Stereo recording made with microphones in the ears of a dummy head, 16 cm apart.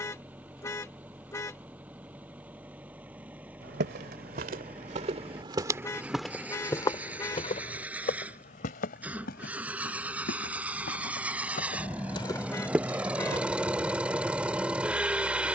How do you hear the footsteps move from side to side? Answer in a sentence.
You can hear the footsteps go left and come back.